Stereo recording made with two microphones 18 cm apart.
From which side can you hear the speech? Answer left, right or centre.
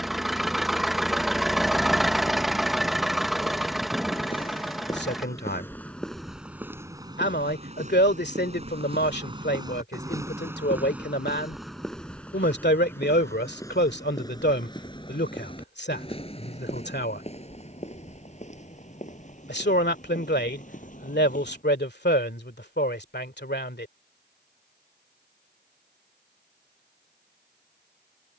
left.